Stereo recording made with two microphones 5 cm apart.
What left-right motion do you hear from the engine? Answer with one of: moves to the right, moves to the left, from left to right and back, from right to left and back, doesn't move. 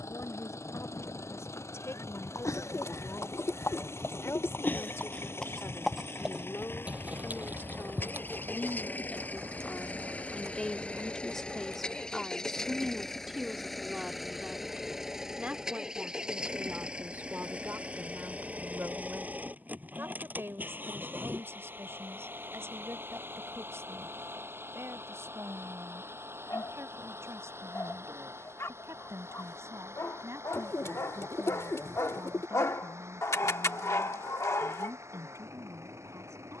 moves to the right.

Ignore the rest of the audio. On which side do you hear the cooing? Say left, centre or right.
left.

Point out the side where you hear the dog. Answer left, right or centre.
left.